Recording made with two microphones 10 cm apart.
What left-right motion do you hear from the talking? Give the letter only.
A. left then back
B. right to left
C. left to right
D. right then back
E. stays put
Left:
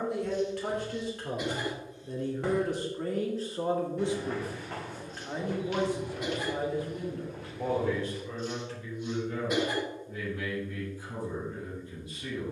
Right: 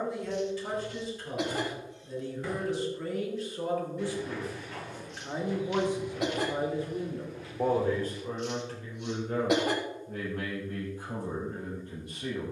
C.